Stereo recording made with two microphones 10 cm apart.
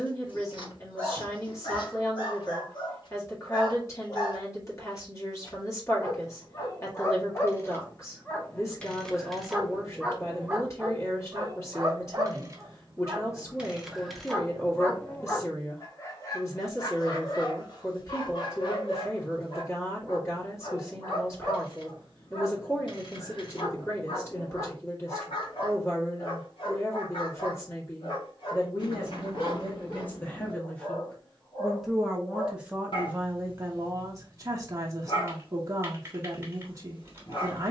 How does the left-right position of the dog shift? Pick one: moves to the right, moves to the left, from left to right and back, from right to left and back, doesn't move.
from left to right and back.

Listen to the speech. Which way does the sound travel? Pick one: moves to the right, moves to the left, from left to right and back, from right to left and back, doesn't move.
moves to the right.